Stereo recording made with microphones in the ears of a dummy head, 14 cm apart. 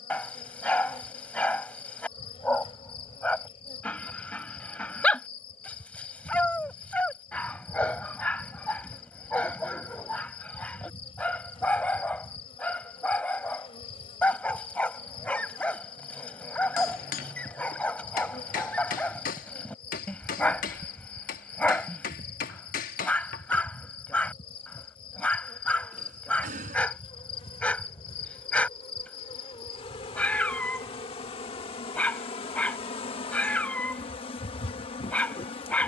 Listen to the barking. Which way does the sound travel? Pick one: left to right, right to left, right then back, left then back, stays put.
stays put.